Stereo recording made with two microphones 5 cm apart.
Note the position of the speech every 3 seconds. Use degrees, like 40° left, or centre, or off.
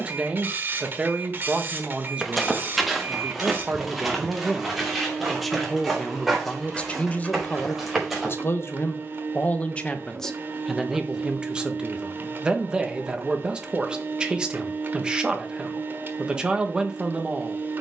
20° right, 10° right, 30° left, centre, 20° right, 20° right.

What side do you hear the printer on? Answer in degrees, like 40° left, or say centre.
40° right.